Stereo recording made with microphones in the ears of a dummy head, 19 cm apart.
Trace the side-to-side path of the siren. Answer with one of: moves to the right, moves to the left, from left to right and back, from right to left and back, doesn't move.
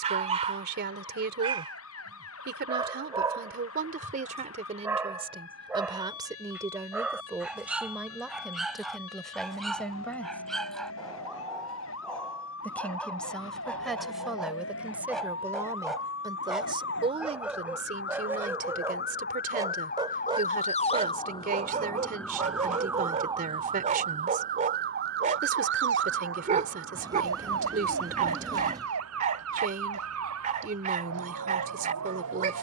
moves to the right.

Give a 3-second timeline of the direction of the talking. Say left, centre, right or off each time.
right, right, centre, centre, centre, right, right, right, right, right, right.